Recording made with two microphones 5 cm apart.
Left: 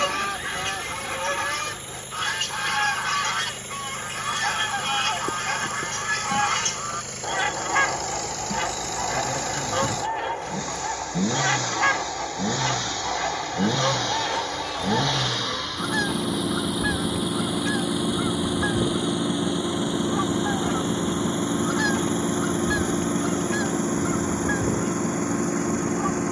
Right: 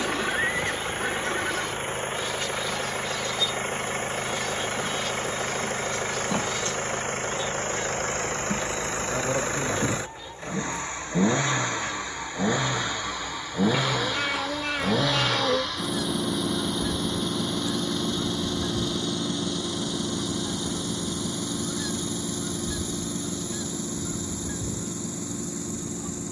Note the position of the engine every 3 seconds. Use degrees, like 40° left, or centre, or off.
50° right, 40° right, 40° right, 30° right, 10° right, centre, 20° left, 40° left, 50° left.